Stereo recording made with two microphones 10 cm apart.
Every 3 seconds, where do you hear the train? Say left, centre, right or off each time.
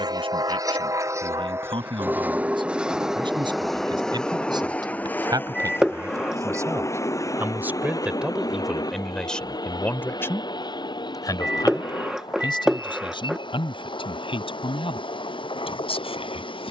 right, centre, left, left, left, left.